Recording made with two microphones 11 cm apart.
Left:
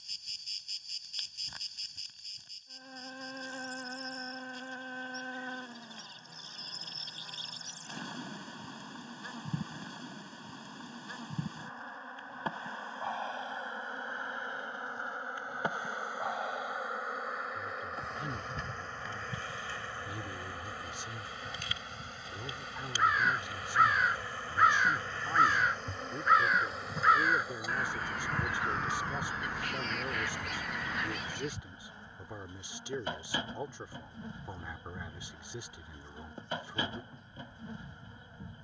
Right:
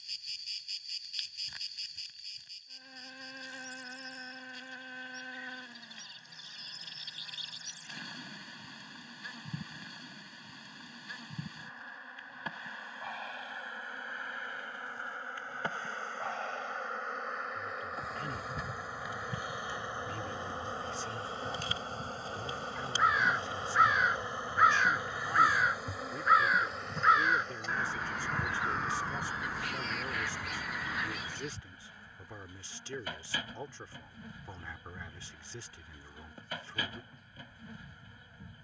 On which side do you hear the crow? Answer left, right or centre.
centre.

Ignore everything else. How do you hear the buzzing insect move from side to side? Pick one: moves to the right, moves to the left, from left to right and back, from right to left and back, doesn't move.
from left to right and back.